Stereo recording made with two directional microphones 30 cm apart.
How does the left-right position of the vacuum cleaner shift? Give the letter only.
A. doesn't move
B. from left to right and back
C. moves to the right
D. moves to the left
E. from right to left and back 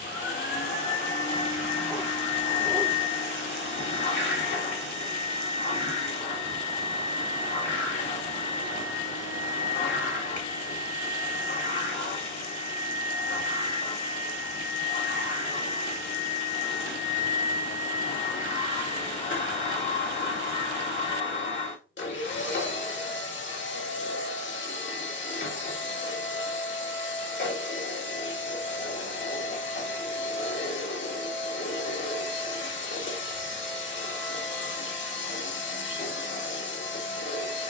A.